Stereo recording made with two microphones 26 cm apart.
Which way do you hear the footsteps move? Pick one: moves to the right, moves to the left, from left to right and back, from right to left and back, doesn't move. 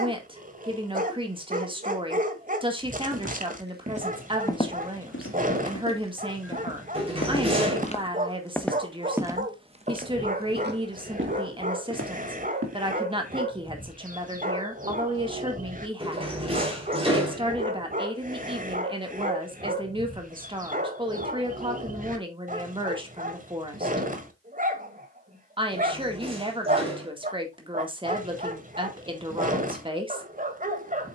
from right to left and back.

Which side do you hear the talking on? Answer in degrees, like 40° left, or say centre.
20° right.